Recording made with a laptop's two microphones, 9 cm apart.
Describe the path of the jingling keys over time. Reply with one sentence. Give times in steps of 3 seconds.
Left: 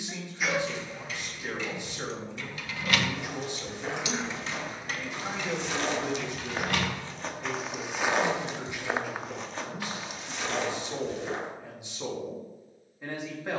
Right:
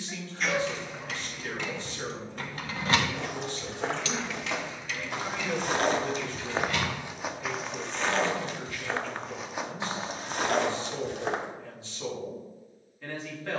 In this clip you hear the jingling keys on the right from 0 s, on the left from 3 s and not at all from 9 s.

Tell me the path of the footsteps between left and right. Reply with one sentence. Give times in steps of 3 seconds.
You can hear the footsteps not at all from 0 s, on the right from 3 s, in the centre from 6 s, on the right from 9 s and not at all from 12 s.